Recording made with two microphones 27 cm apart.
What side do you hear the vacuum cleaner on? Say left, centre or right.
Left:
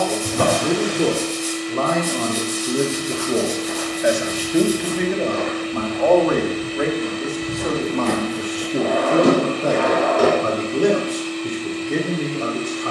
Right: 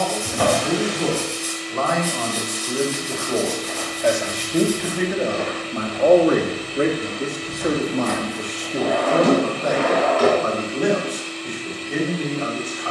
left.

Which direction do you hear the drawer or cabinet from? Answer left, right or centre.
left.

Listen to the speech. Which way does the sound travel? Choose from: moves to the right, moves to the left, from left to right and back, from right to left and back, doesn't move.
from left to right and back.